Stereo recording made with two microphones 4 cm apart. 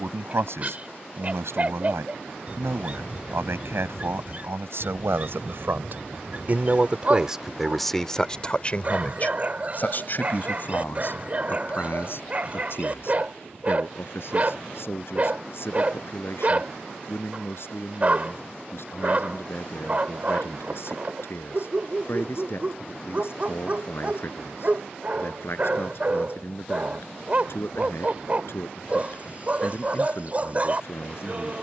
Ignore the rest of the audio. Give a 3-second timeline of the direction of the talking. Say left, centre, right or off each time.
right, right, centre, left, left, left, left, left, left, left, left.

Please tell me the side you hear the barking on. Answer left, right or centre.
right.